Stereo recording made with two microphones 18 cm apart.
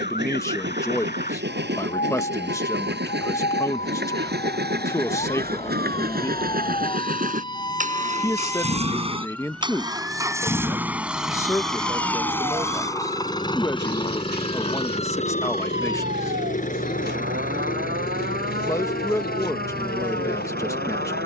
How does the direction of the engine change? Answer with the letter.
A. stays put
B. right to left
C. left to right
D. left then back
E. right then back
B.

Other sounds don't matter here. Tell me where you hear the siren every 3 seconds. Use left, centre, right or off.
left, left, left, centre, right, right, right.